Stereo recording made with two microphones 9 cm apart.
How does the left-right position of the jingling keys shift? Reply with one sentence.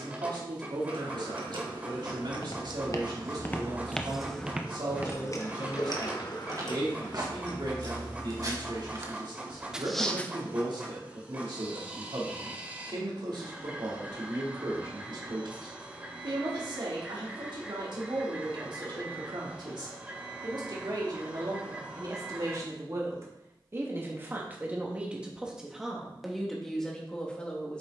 You can hear the jingling keys move to the left.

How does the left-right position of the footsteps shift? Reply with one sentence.
You can hear the footsteps move from left to right and back again.